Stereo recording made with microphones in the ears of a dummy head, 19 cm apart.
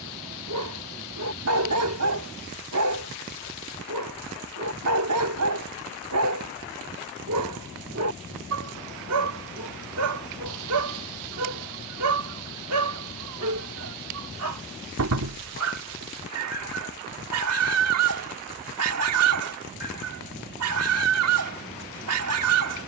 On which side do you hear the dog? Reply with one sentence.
In this clip you hear the dog on the right.